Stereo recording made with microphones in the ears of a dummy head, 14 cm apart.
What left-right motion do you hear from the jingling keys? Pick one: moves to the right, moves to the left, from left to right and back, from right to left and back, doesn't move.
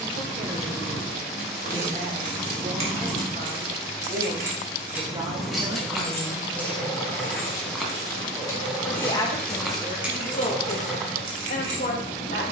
from right to left and back.